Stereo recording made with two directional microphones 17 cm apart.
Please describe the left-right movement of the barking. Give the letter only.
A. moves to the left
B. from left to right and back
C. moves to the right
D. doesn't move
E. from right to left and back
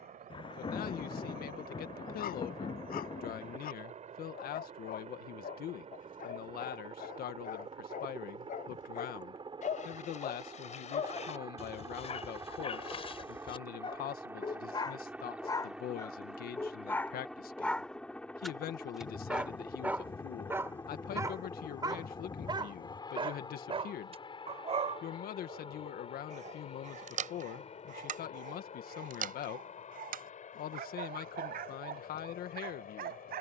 C.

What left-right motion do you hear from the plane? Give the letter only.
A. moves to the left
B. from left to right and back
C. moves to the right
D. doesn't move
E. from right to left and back
A.